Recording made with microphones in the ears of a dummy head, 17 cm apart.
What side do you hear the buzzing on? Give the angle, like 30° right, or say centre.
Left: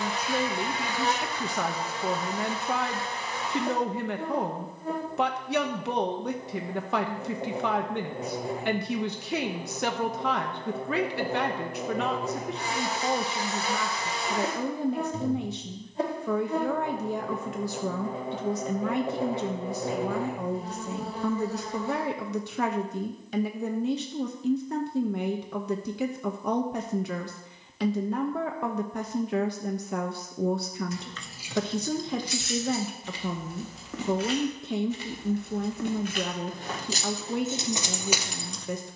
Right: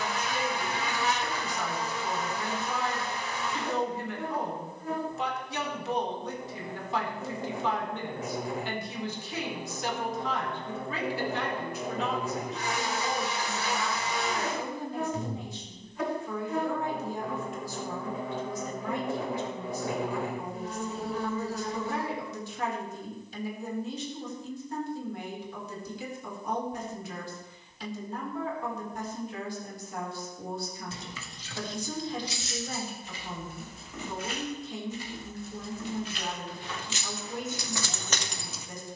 30° left.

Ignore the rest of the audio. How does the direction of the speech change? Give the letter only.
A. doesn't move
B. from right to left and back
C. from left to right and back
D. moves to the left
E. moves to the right
A.